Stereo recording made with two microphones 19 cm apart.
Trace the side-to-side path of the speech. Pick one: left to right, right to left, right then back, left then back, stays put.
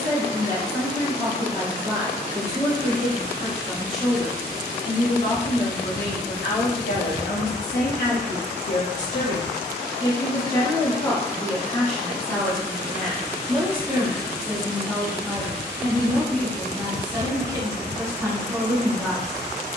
left then back.